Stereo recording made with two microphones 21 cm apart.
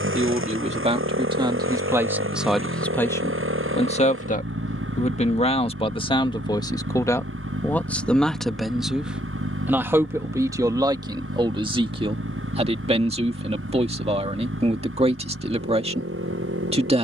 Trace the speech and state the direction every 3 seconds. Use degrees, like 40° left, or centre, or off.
20° right, 30° left, 10° left, 20° right, 30° right, 30° right.